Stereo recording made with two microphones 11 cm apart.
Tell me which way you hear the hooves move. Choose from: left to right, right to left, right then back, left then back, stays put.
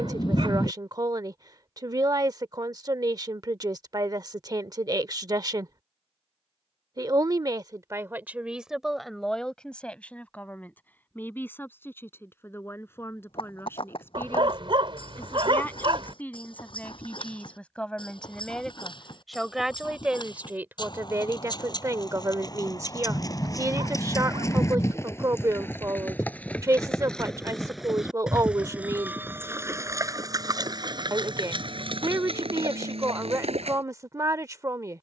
left to right.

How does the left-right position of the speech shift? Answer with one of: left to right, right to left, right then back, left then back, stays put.
left then back.